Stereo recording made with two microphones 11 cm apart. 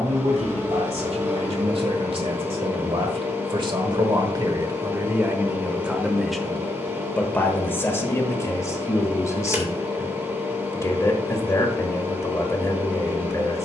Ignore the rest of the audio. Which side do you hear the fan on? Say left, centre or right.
right.